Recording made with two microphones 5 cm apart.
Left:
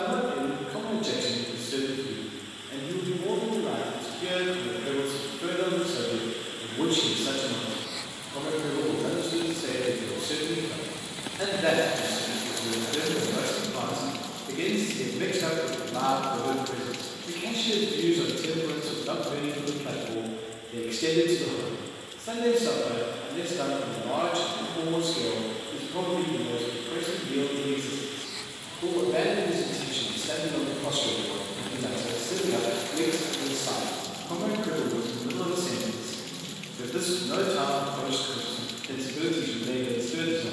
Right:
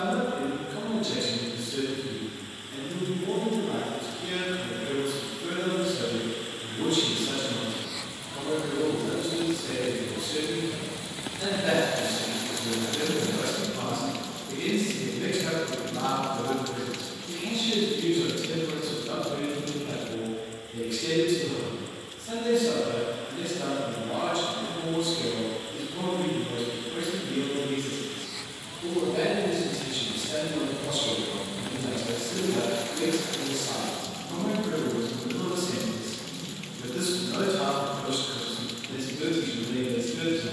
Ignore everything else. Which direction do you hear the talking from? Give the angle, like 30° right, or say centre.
50° left.